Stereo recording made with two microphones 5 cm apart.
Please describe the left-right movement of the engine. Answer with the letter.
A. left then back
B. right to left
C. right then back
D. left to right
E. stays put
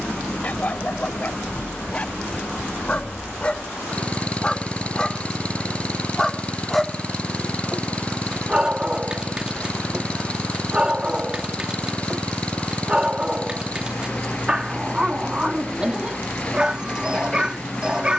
E.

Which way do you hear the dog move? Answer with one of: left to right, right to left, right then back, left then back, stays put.
left to right.